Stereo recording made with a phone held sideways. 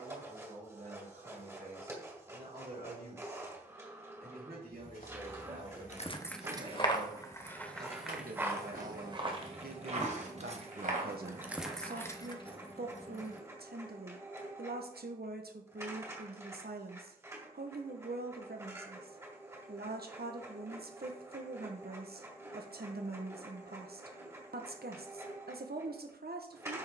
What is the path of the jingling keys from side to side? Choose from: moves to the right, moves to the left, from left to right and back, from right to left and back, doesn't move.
from left to right and back.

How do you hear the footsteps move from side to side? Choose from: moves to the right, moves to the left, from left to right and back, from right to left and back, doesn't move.
moves to the right.